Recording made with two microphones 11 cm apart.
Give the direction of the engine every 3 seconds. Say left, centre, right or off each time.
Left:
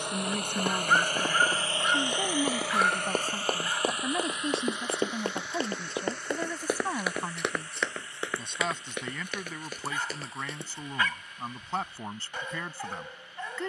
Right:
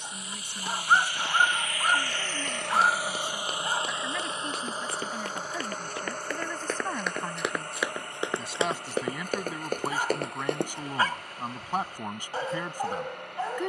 left, right, right, right, right.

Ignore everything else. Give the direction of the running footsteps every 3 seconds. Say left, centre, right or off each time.
left, left, centre, right, off.